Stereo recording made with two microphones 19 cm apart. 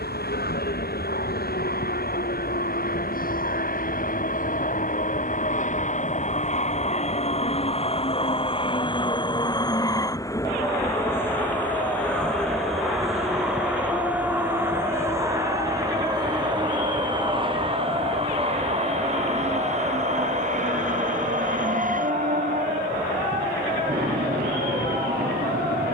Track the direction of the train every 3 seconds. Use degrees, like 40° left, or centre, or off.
60° left, 50° left, 30° left, 20° left, centre, 20° right, 40° right, 50° right, 50° right.